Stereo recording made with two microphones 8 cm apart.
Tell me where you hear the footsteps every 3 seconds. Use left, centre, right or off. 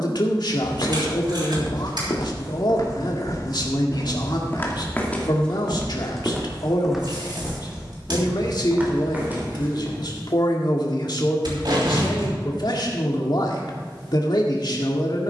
left, left, centre, right, off.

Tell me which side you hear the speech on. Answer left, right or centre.
left.